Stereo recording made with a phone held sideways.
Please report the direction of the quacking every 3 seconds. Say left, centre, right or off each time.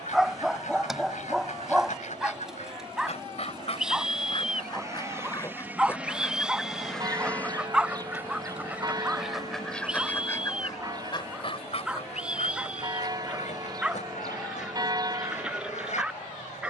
left, left, centre, left, left, left.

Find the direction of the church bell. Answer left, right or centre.
right.